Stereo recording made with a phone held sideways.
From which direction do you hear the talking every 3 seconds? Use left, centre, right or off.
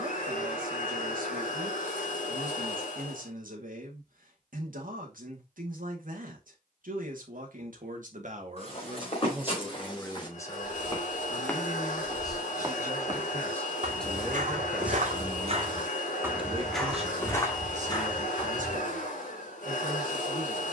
right, right, right, centre, centre, right, right.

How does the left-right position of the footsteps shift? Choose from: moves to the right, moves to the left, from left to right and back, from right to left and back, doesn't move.
from left to right and back.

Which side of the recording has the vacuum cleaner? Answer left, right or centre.
left.